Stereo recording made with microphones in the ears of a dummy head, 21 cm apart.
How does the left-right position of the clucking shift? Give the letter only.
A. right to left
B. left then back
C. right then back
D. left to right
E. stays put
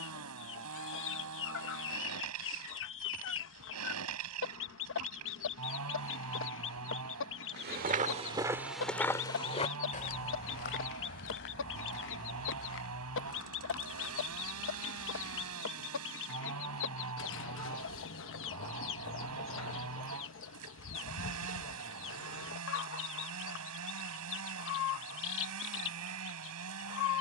E.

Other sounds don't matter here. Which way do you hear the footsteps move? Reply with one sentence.
You can hear the footsteps travel towards the left.